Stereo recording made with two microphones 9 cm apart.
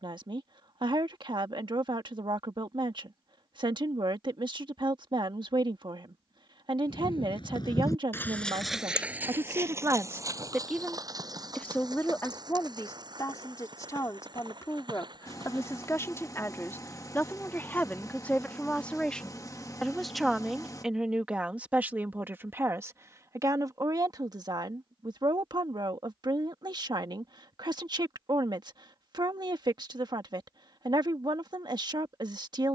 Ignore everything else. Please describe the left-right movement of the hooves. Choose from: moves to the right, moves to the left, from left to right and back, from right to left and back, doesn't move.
moves to the right.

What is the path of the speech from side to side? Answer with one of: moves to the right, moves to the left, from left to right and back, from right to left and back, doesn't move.
from right to left and back.